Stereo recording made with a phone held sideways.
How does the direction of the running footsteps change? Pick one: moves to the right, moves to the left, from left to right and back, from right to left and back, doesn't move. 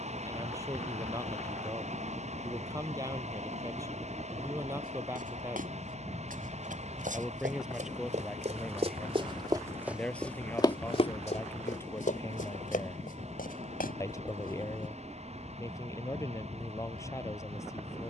moves to the left.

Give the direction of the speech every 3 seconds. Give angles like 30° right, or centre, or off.
20° right, 20° right, centre, 10° left, 20° left, 20° left.